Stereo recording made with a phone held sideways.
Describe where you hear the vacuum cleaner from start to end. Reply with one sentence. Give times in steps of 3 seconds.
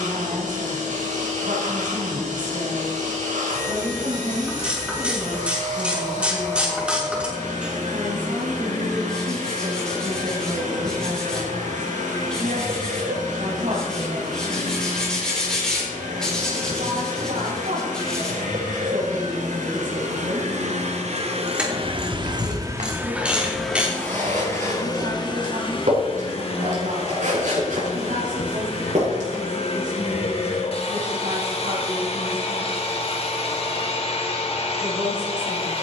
In this clip you hear the vacuum cleaner on the right from 0 s and on the left from 24 s.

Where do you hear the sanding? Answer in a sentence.
In this clip you hear the sanding in the centre.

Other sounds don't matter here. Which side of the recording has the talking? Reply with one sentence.
You can hear the talking on the right.